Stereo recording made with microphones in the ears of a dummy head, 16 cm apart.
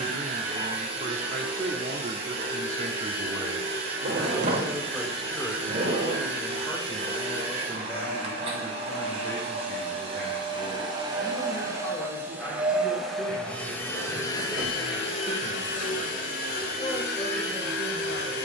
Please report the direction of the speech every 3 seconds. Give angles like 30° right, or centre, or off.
40° right, 10° right, 10° left, 20° left, 20° left, 20° left.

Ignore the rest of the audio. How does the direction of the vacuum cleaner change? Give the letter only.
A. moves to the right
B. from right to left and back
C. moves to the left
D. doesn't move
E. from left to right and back
C.